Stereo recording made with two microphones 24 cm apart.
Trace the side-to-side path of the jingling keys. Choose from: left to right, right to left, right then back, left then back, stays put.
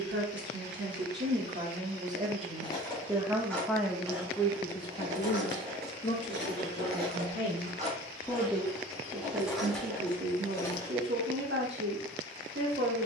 right then back.